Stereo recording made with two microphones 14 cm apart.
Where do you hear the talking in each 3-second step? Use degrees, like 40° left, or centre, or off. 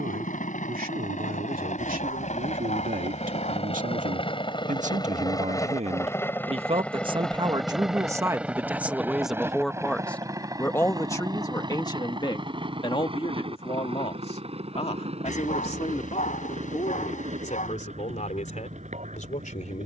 70° right, 60° right, 30° right, 10° left, 40° left, 50° left, 60° left.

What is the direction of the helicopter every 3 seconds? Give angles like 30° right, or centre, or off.
60° left, 30° left, centre, 20° right, 40° right, 40° right, 50° right.